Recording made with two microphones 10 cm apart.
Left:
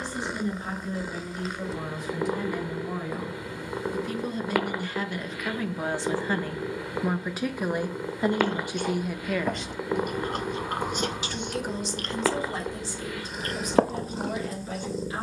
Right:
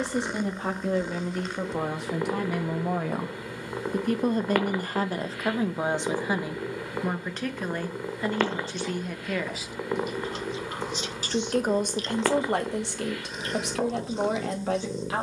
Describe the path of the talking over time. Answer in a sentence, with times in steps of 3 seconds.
In this clip you hear the talking on the right from 0 s, in the centre from 6 s and on the right from 9 s.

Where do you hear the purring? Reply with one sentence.
You can hear the purring in the centre.